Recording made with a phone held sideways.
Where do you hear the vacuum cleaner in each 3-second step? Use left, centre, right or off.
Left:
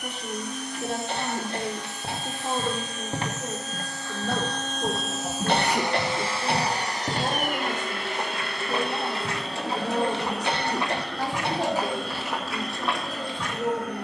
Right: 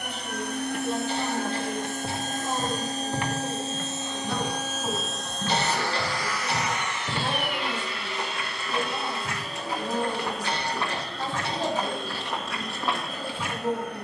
right, centre, left, left, left.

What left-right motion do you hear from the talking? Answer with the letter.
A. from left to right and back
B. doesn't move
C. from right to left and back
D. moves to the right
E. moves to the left
B.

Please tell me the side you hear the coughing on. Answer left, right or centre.
left.